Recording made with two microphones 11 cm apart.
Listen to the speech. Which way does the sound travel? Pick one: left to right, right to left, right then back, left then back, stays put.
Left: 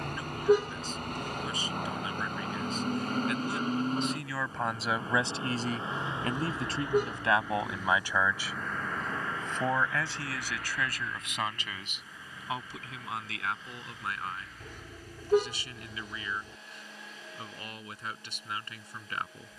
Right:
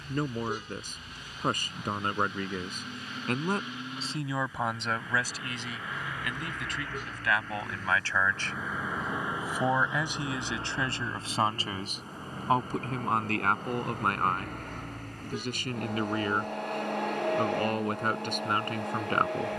left then back.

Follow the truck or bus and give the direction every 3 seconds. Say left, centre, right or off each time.
left, left, centre, right, right, right, right.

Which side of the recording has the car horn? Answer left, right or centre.
left.